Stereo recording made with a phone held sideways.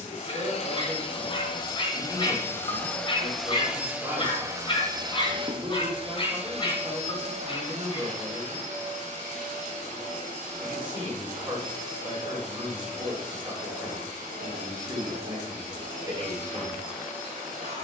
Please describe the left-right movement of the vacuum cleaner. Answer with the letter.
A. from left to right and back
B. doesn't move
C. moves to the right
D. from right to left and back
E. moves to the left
C.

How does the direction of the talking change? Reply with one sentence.
You can hear the talking stay put.